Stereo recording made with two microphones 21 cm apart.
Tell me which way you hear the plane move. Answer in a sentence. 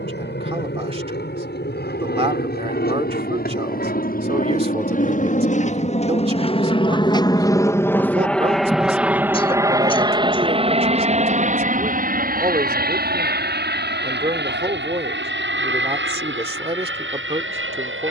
You can hear the plane move to the right.